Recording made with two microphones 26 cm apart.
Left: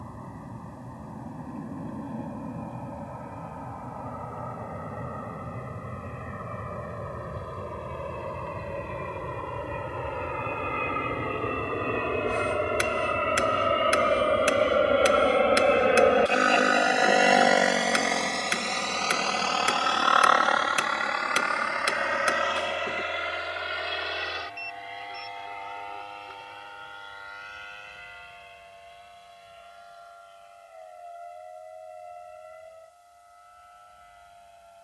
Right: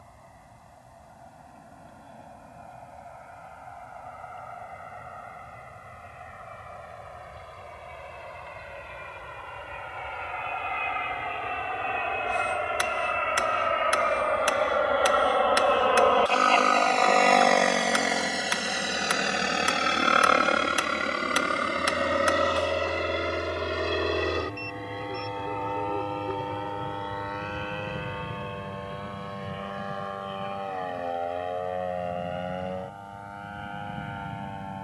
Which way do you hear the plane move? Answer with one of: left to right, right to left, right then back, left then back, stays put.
left to right.